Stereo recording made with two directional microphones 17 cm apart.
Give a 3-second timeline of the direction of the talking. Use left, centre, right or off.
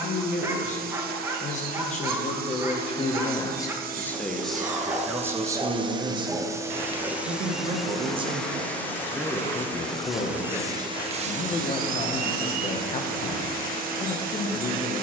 left, centre, right, left, left.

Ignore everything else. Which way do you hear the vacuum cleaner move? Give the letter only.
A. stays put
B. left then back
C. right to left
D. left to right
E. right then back
B.